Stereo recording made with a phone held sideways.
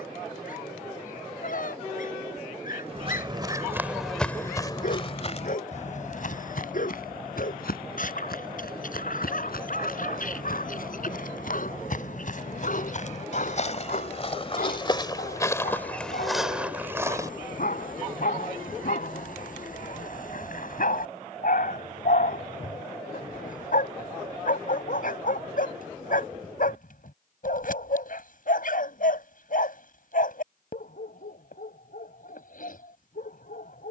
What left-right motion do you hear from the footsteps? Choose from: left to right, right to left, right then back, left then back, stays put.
left then back.